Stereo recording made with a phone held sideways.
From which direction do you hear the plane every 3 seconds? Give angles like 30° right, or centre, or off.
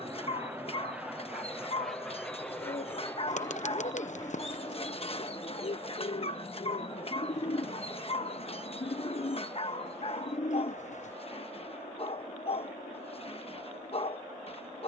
centre, 30° left, 50° left, 60° left, 60° left.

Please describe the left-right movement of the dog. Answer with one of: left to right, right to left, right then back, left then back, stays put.
stays put.